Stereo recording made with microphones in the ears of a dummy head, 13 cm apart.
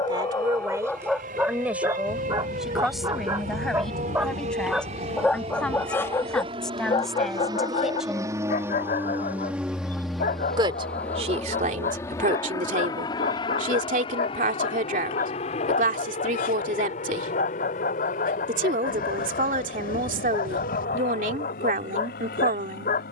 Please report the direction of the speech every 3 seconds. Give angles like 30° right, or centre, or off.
10° right, centre, centre, 50° right, 60° right, 60° right, 60° right, 60° right.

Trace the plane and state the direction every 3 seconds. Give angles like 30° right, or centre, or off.
60° right, 50° right, 30° right, centre, 30° left, 50° left, 60° left, 60° left.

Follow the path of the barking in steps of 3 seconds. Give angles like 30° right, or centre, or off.
centre, 10° right, 40° left, 60° left, 60° left, 60° left, 60° left, 60° left.